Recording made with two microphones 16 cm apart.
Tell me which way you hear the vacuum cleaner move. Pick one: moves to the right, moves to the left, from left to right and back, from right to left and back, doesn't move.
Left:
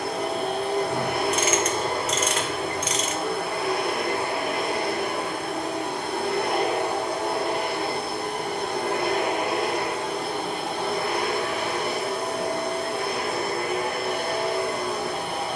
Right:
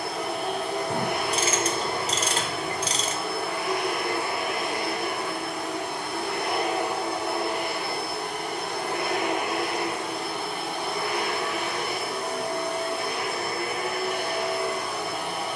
doesn't move.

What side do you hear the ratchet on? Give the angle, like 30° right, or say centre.
30° right.